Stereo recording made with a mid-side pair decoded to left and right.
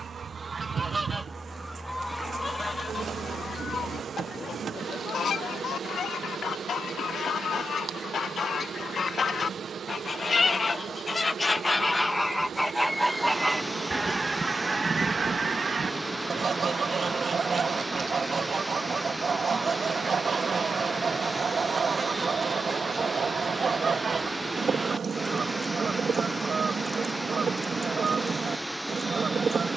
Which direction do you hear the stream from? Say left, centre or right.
centre.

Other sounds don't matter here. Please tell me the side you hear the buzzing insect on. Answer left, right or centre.
right.